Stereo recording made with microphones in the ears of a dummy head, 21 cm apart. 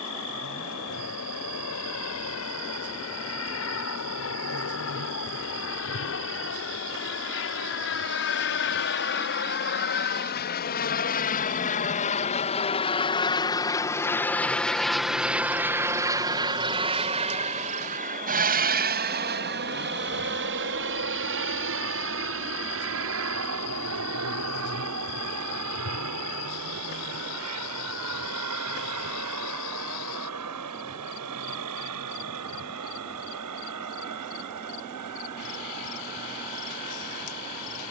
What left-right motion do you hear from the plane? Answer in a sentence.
In this clip you hear the plane move to the right.